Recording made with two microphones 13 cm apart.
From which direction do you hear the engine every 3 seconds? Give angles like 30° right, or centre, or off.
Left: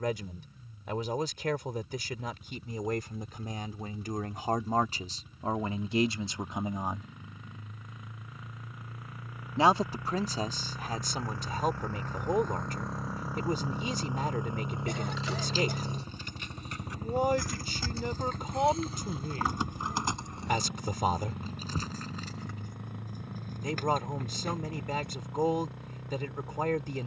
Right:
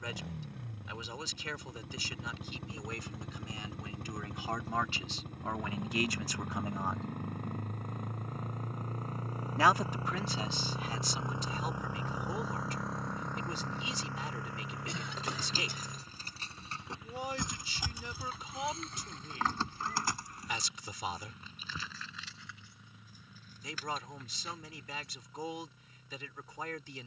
70° right, 60° right, 50° right, 30° right, 10° left, 40° left, 60° left, 70° left, 70° left.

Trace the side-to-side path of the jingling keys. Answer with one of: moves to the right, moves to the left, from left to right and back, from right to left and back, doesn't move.
moves to the left.